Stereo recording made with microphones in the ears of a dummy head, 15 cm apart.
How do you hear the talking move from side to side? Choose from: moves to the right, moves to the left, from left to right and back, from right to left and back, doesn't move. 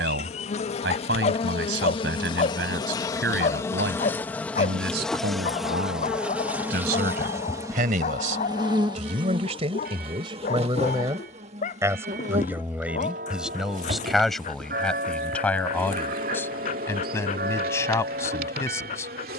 moves to the left.